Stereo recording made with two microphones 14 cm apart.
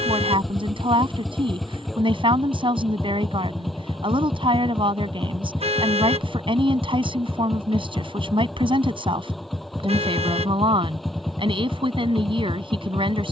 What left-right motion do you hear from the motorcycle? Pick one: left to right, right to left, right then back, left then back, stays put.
stays put.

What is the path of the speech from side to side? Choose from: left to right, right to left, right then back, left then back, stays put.
stays put.